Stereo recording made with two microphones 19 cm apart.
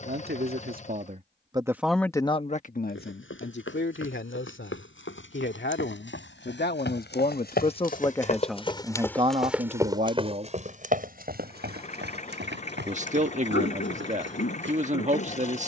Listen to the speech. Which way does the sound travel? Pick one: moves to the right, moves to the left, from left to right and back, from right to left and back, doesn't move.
from right to left and back.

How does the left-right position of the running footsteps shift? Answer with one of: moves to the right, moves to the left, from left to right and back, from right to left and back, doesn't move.
moves to the right.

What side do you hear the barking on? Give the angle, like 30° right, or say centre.
70° left.